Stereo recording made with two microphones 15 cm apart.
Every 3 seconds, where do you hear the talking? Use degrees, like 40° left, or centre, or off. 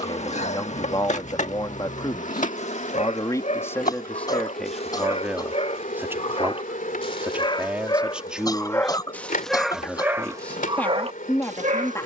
30° left, 10° left, 10° right, 10° left.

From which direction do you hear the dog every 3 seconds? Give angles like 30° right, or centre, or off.
50° left, 50° left, 30° left, 30° right.